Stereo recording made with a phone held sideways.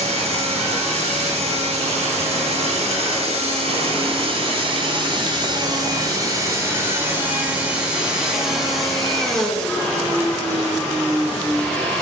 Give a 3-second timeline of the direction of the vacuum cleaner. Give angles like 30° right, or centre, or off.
60° right, 40° right, 10° right, 10° left.